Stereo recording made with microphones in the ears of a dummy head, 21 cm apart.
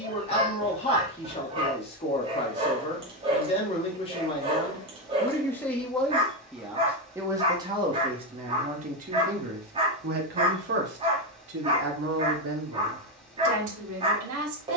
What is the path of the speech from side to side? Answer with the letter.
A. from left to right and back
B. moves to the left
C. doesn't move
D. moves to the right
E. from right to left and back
D.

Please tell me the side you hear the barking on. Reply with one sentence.
In this clip you hear the barking on the right.